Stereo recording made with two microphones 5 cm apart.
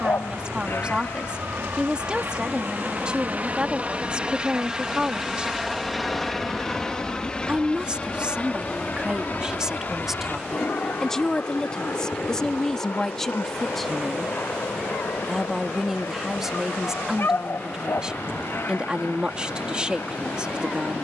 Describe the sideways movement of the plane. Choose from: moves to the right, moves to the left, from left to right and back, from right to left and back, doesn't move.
moves to the left.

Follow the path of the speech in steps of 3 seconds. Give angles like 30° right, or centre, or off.
20° right, 20° right, 20° right, centre, 10° left, 10° right, 20° right.